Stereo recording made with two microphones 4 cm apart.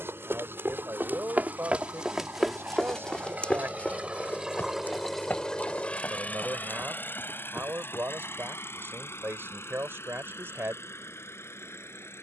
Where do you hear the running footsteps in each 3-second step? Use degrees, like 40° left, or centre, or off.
30° right, 40° left, 60° left, off.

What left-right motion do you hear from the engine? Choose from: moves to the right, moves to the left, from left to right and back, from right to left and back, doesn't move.
moves to the left.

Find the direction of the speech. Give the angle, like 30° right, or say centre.
60° right.